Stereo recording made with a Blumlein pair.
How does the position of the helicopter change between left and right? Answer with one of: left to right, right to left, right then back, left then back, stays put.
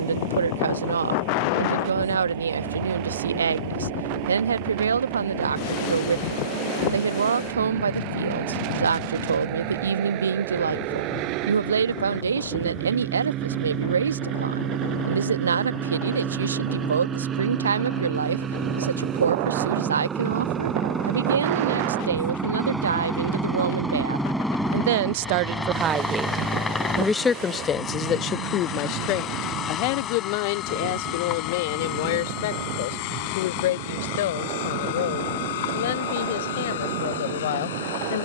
right to left.